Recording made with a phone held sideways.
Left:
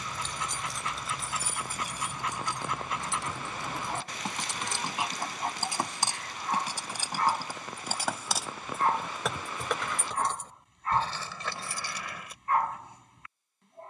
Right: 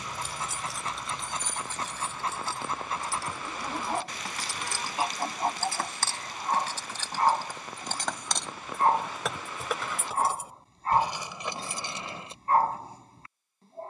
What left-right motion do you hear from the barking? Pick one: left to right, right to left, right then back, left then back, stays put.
stays put.